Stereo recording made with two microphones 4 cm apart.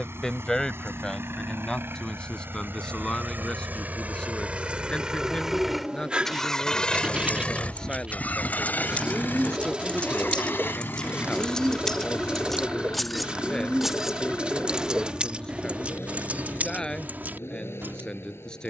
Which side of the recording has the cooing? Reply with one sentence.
In this clip you hear the cooing on the right.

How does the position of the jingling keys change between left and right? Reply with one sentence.
In this clip you hear the jingling keys go from the left side to the right.